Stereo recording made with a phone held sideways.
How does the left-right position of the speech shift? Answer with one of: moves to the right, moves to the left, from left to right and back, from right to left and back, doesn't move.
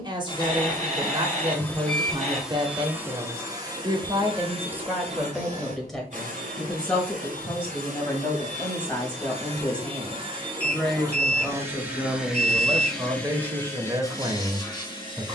from right to left and back.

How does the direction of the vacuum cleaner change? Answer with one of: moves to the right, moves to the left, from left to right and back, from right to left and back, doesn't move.
from left to right and back.